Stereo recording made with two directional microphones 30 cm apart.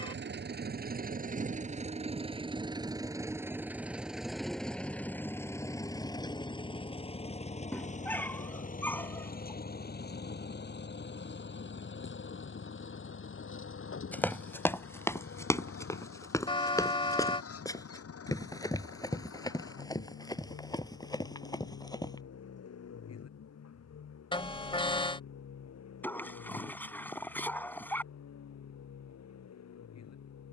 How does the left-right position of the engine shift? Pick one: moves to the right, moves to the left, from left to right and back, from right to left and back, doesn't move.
moves to the left.